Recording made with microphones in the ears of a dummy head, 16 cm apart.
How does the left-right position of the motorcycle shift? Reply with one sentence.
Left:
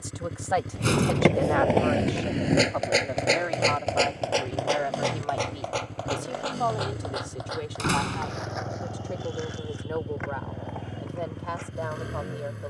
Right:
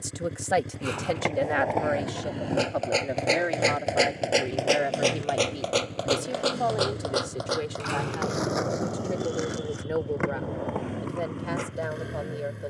You can hear the motorcycle stay put.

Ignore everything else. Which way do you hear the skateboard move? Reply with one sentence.
You can hear the skateboard go from the left side to the right.